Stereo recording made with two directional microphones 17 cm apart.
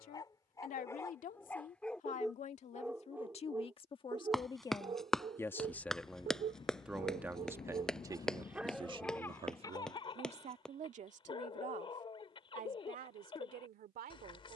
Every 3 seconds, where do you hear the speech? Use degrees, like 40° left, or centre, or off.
50° left, 30° left, 20° right, 40° right, 60° right.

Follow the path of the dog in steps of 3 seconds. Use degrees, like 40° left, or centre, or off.
10° left, 30° right, 30° right, 30° left, 30° left.